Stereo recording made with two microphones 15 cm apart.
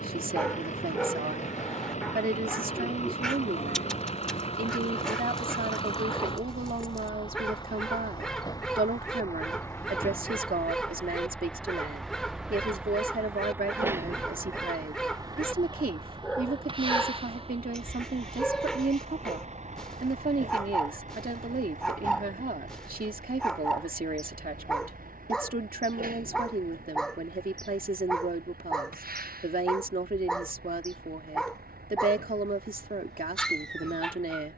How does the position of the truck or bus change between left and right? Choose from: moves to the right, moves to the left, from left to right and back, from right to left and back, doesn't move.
moves to the right.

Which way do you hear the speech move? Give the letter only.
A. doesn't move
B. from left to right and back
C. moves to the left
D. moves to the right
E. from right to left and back
A.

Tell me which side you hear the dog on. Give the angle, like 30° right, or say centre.
centre.